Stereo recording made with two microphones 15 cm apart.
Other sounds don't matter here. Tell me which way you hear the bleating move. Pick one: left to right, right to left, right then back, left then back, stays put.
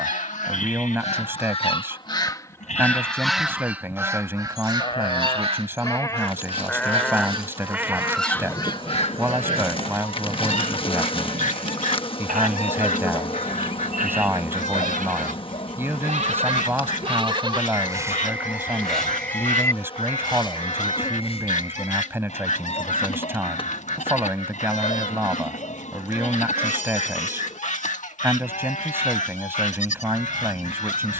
right then back.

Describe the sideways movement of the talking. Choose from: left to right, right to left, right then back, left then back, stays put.
stays put.